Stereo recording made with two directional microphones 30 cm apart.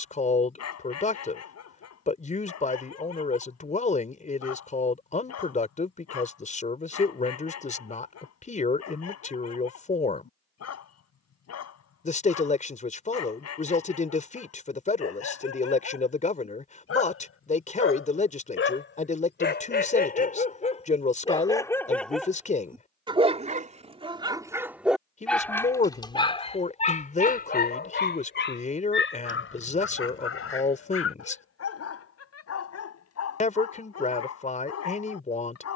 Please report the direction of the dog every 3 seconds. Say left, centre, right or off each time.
left, left, left, left, left, left, left, centre, centre, left, left, left.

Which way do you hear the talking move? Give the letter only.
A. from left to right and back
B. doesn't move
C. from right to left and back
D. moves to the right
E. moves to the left
B.